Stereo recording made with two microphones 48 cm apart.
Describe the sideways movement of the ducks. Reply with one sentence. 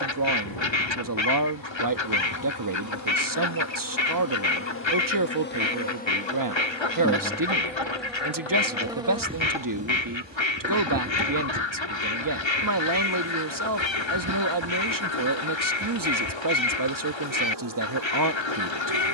In this clip you hear the ducks stay put.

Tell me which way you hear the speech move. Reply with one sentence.
You can hear the speech stay in one place.